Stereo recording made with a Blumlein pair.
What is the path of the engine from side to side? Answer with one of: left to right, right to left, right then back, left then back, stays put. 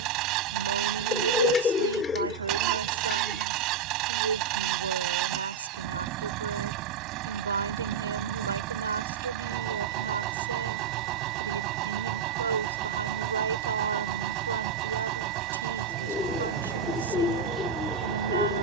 stays put.